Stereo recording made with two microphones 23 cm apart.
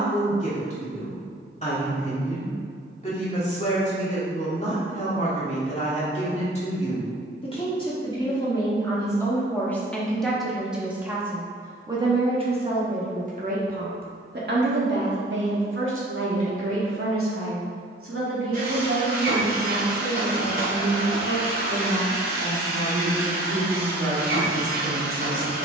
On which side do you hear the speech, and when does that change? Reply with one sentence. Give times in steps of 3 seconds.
You can hear the speech on the left from 0 s, in the centre from 9 s and on the right from 12 s.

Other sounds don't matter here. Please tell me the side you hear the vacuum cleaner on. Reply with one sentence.
You can hear the vacuum cleaner on the right.